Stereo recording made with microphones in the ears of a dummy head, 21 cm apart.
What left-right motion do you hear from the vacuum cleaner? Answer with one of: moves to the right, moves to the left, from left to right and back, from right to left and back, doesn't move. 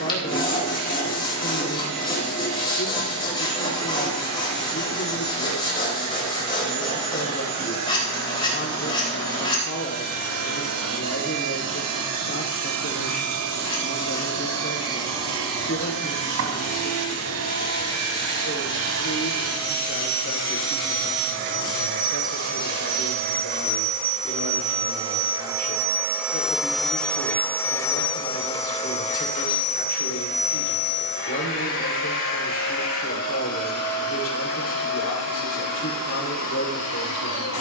moves to the left.